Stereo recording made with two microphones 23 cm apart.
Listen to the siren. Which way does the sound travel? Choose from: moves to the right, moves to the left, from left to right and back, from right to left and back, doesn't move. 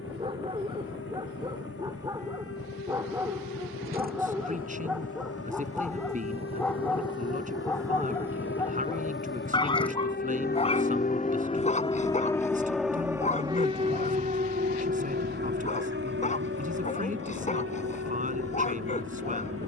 moves to the right.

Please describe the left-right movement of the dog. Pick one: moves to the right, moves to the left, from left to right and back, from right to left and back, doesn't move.
moves to the left.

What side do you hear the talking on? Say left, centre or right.
right.